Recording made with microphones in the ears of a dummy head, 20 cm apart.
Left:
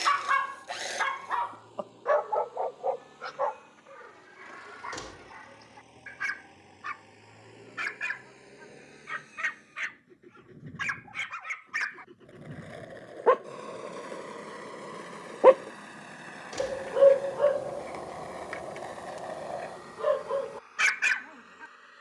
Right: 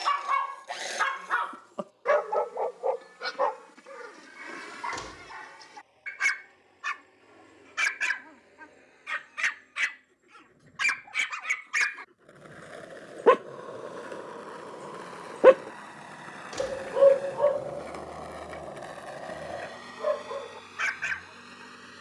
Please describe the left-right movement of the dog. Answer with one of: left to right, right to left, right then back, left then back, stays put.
right then back.